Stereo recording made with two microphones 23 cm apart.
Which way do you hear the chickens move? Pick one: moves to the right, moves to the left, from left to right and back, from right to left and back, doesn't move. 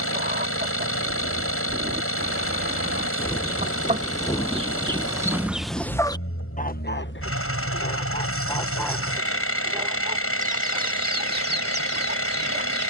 from right to left and back.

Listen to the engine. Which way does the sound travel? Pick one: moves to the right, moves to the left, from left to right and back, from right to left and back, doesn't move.
doesn't move.